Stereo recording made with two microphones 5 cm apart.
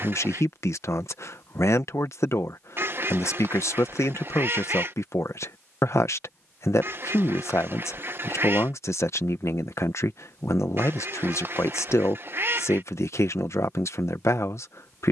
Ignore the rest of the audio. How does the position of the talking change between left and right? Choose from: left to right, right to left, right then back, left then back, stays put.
stays put.